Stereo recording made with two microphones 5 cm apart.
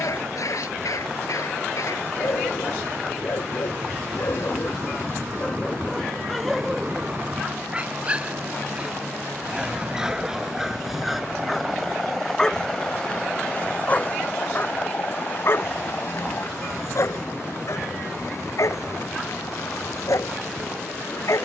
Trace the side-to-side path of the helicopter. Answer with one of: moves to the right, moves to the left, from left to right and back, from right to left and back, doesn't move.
moves to the left.